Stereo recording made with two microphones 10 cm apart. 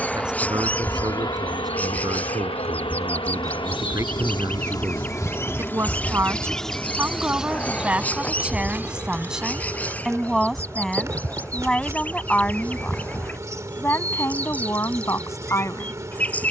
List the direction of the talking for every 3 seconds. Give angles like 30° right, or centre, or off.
40° right, 30° right, 10° right, centre, 20° left, 30° left.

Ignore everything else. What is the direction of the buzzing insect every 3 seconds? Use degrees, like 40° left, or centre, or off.
40° left, 40° left, 10° right, 30° right, 30° right, 30° right.